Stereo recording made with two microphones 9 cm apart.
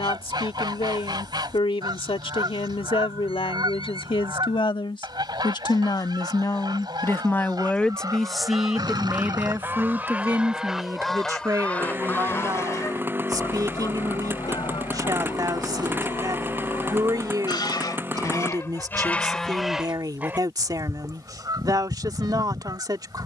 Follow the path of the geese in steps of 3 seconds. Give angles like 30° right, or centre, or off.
50° right, 50° right, 50° right, 10° right, 40° left, 60° left, 10° left, 50° right.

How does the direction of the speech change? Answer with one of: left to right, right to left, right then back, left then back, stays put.
left to right.